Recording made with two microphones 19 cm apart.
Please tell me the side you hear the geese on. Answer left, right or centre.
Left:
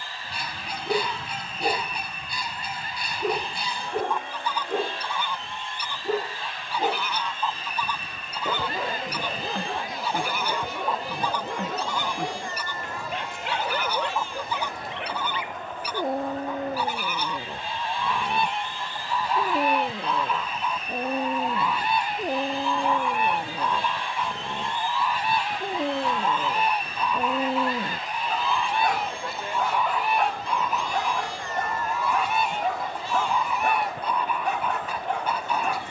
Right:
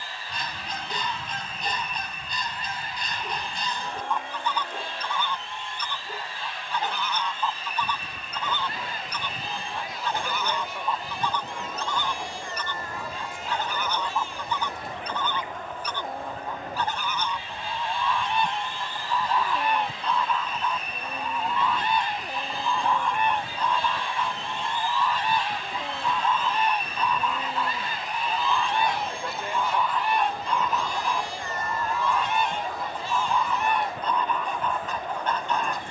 centre.